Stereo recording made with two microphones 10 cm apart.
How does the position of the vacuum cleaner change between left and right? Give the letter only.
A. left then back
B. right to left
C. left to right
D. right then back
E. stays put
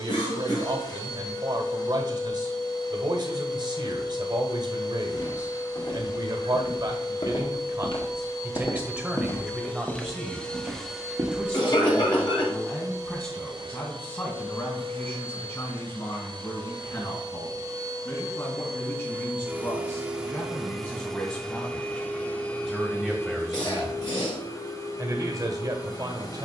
D.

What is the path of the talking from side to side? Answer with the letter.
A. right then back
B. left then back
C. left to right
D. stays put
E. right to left
B.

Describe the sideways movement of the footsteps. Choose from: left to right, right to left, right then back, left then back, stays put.
left to right.